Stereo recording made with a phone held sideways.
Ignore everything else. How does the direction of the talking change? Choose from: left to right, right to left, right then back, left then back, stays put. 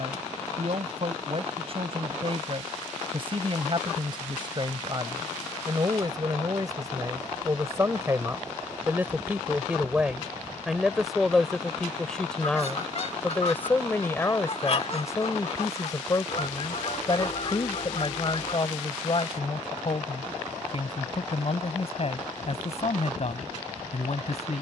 right to left.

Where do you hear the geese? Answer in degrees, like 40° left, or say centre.
50° left.